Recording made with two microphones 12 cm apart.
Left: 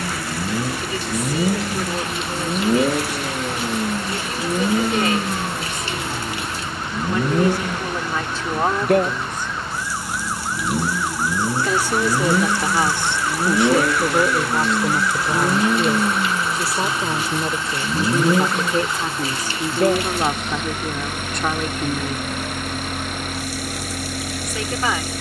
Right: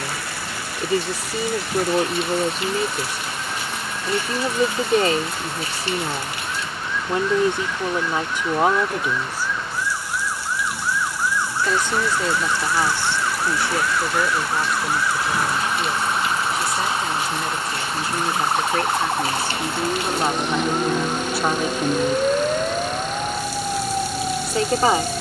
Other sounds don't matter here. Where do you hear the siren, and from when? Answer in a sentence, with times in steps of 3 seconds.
You can hear the siren on the left from 0 s, in the centre from 12 s and on the right from 15 s.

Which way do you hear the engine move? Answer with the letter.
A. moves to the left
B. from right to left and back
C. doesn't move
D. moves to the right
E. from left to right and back
C.